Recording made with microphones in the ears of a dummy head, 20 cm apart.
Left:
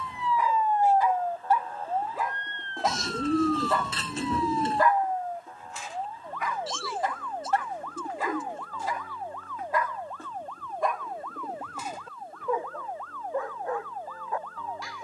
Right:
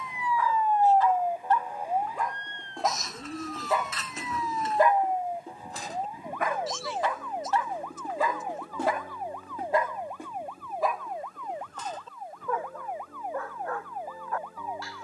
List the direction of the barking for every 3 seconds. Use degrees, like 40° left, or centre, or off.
10° left, 20° right, 50° right, 10° right, 10° left.